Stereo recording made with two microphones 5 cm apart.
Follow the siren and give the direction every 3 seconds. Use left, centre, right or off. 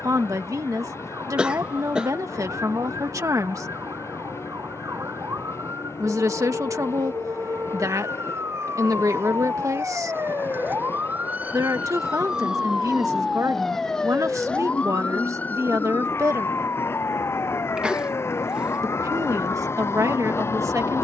right, right, right, right, centre, left, left.